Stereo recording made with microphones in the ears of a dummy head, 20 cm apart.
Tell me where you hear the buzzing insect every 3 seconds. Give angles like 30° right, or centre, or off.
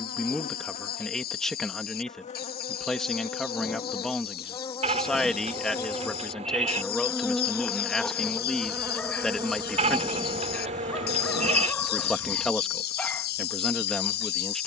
30° left, 20° left, centre, 30° right, 60° right.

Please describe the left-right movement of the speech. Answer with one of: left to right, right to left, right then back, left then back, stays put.
stays put.